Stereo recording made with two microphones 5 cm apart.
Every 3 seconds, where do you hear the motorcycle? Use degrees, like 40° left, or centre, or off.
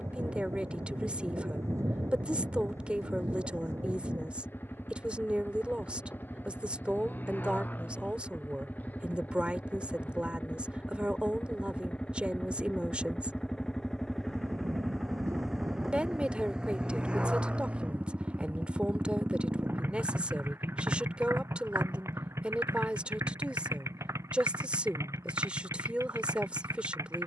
50° left, 50° left, 40° left, 30° left, 10° left, 10° right, 40° right, 60° right, 80° right.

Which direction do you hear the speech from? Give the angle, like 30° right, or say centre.
20° right.